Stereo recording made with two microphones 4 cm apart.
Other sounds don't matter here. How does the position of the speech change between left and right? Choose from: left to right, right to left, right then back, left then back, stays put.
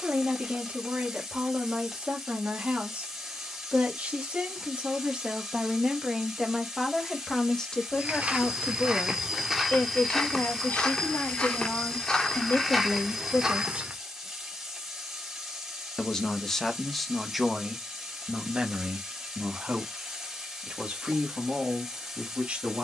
left then back.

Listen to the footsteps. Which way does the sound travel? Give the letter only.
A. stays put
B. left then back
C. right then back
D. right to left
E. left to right
B.